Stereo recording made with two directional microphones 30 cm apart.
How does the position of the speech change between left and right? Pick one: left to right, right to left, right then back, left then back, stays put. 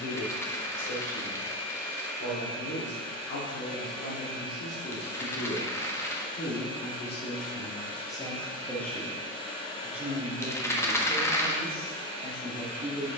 left to right.